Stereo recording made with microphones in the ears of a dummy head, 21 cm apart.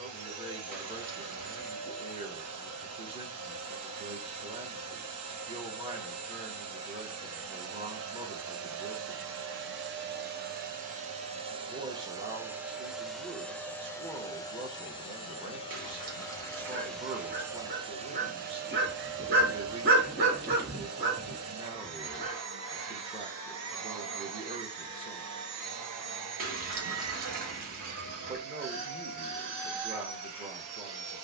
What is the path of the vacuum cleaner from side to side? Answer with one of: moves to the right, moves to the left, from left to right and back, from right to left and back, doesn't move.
from right to left and back.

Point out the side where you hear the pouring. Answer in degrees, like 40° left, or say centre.
40° right.